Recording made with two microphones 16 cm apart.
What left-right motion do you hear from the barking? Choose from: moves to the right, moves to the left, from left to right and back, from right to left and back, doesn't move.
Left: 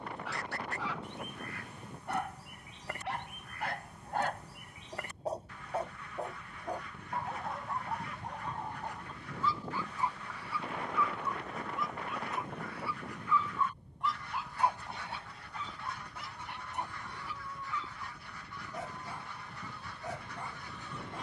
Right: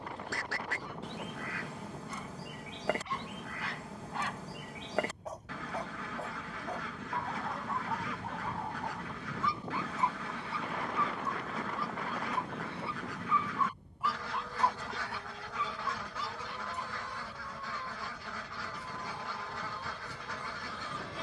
from left to right and back.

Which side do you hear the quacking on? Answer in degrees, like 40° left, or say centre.
80° right.